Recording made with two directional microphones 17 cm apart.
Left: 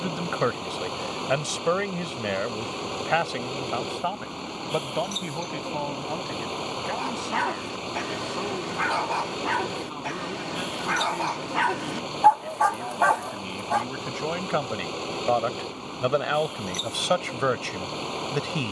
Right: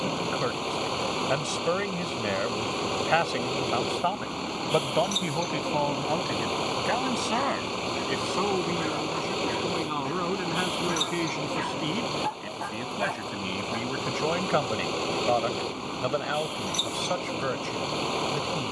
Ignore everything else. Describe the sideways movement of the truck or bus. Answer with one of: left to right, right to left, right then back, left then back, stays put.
stays put.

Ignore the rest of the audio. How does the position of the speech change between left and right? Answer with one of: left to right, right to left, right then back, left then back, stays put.
right then back.